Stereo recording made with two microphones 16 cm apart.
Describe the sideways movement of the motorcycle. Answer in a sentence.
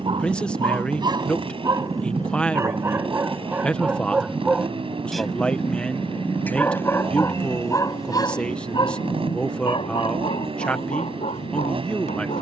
You can hear the motorcycle stay put.